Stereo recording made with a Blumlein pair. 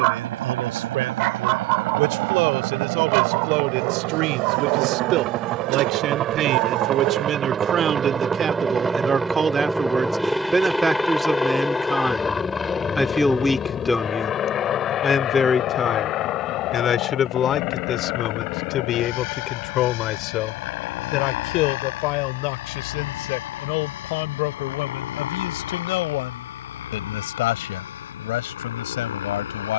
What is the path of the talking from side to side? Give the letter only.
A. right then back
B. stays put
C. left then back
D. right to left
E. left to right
D.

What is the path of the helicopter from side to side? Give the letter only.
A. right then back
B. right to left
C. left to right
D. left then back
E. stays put
B.